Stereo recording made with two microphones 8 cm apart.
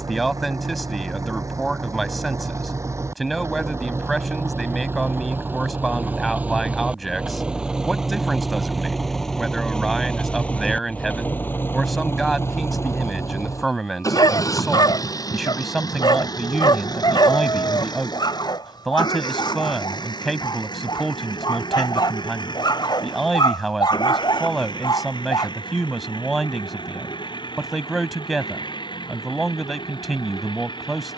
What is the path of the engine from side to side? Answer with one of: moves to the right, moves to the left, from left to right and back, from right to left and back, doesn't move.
moves to the left.